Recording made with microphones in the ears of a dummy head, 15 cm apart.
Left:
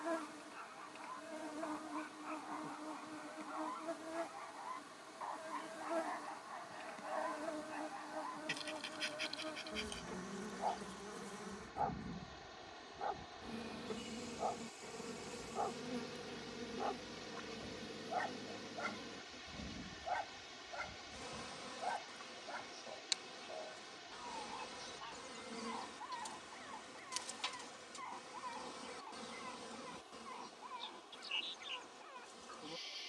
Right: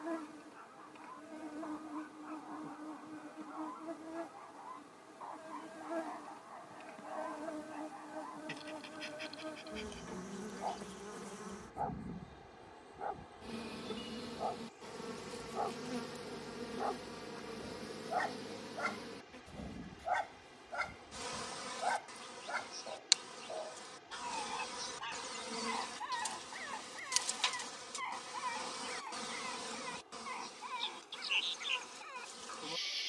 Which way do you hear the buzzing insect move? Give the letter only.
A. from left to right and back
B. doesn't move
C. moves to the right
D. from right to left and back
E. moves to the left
C.